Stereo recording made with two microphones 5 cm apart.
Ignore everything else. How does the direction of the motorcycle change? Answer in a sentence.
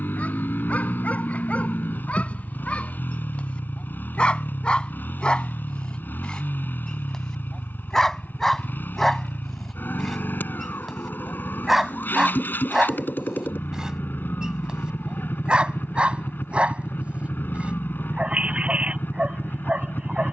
In this clip you hear the motorcycle stay put.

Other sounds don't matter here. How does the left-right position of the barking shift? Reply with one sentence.
In this clip you hear the barking move from left to right.